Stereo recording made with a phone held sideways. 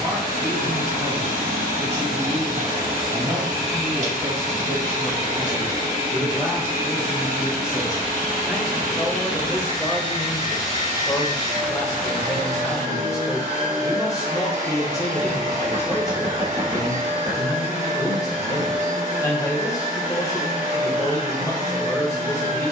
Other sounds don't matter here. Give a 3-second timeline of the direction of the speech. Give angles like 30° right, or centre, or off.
20° right, 20° right, 10° right, 10° left, 20° left, 20° left, 20° left, 20° left.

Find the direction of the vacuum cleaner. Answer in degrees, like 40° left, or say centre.
60° right.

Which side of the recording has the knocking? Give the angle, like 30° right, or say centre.
40° right.